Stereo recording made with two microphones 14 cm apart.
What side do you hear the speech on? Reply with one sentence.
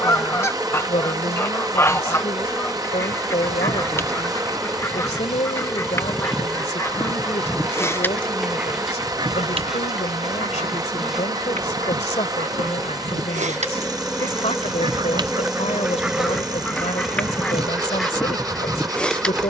In this clip you hear the speech on the left.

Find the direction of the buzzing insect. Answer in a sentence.
In this clip you hear the buzzing insect in the centre.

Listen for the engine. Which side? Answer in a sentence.
In this clip you hear the engine on the right.